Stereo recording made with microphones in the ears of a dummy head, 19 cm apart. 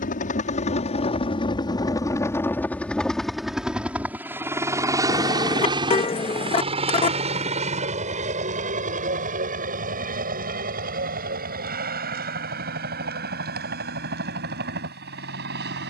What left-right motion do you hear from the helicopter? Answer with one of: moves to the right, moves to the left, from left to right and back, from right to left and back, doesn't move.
moves to the right.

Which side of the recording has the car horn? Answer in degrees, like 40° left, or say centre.
30° left.